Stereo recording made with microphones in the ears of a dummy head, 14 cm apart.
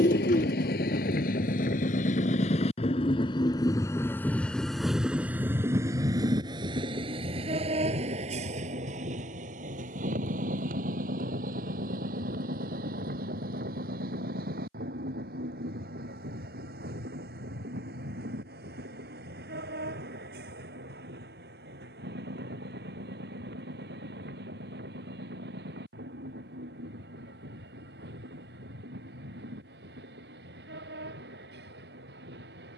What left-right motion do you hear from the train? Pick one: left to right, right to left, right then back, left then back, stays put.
left to right.